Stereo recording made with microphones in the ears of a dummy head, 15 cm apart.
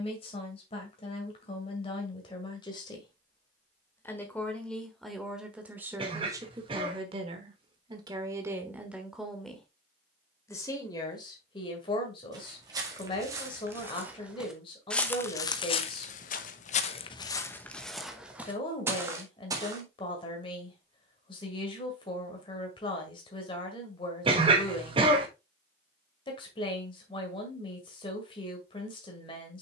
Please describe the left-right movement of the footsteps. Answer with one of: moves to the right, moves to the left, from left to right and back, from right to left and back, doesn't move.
from right to left and back.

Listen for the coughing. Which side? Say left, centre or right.
right.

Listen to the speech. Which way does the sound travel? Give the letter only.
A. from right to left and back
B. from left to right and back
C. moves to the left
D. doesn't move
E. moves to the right
B.